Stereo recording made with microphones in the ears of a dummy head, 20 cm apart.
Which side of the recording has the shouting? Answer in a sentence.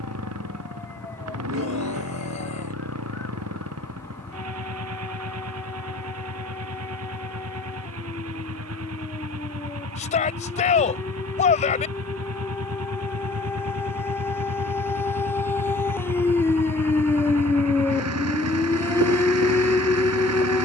In this clip you hear the shouting on the left.